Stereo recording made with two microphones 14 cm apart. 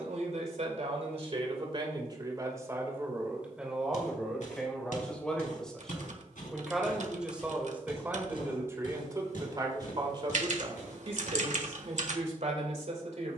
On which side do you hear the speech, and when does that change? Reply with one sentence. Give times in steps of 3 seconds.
In this clip you hear the speech on the right from 0 s, in the centre from 3 s and on the right from 9 s.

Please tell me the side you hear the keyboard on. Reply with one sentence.
In this clip you hear the keyboard on the right.